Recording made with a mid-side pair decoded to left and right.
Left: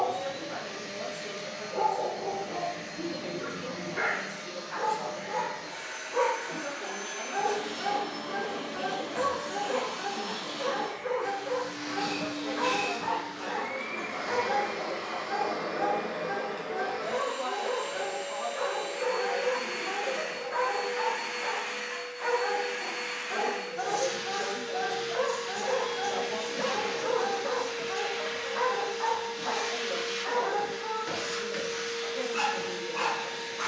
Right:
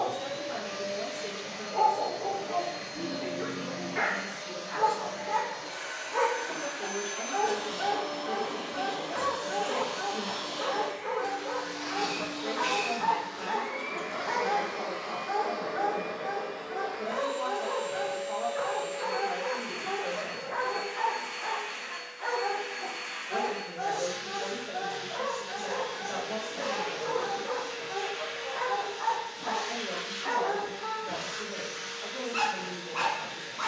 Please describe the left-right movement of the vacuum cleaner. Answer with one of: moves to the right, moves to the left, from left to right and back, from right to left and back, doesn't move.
moves to the left.